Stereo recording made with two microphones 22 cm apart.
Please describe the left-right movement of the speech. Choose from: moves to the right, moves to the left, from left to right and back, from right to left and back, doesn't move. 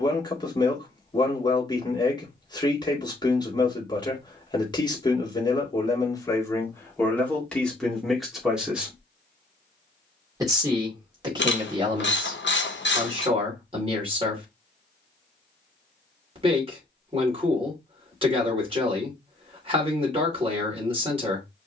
moves to the right.